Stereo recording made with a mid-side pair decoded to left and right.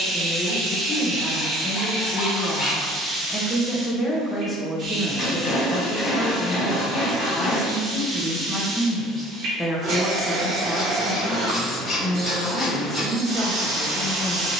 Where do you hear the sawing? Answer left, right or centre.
left.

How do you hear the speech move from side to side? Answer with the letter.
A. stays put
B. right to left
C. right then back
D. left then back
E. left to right
A.